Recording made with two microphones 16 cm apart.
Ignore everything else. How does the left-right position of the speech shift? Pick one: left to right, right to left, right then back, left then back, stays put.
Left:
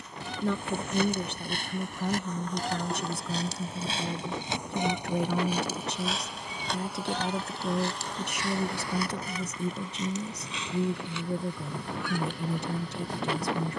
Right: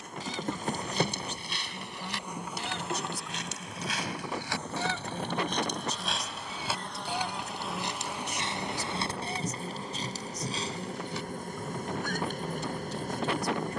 stays put.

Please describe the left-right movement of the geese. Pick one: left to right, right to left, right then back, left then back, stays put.
left to right.